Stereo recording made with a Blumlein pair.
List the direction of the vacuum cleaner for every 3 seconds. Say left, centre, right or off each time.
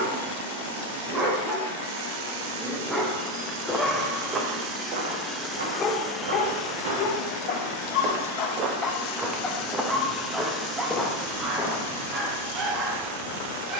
right, right, left, centre, right.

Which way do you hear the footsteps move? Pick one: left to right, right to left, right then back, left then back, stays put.
right then back.